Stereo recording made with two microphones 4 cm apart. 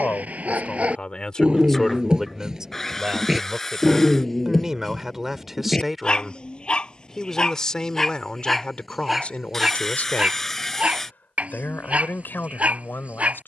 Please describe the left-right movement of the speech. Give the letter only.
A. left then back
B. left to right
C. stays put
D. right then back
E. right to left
D.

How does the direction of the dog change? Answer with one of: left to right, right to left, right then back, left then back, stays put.
left then back.